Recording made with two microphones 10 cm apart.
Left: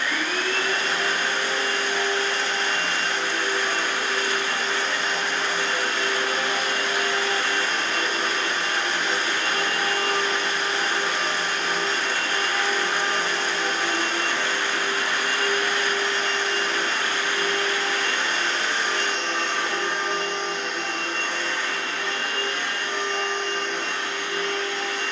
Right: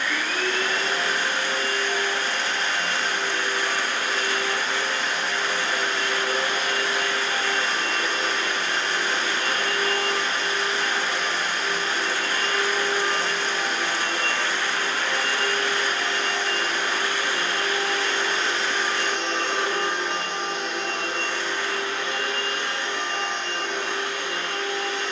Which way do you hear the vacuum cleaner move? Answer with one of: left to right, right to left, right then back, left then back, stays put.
left to right.